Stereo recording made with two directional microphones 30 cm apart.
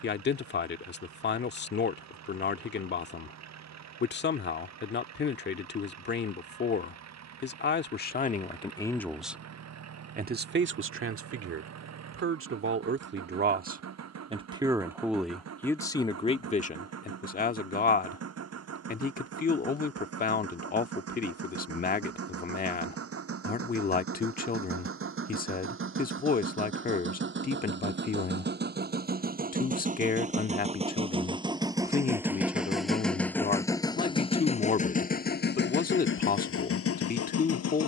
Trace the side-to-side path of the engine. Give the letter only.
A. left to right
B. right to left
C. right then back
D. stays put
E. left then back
B.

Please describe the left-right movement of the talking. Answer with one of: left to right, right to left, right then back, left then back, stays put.
right then back.